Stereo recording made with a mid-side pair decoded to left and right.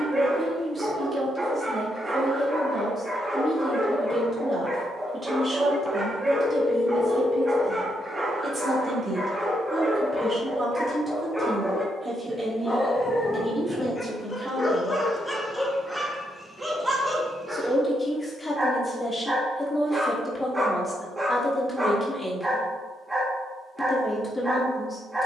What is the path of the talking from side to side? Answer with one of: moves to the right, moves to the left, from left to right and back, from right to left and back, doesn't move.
moves to the left.